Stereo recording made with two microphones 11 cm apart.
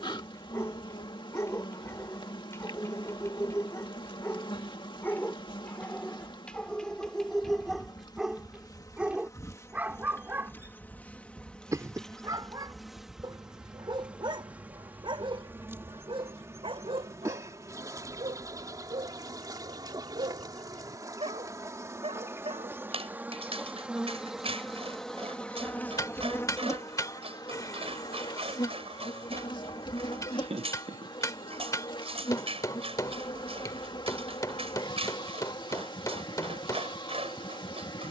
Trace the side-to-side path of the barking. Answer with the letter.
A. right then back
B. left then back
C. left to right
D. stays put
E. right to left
C.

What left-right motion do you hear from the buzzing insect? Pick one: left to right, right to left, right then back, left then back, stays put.
right then back.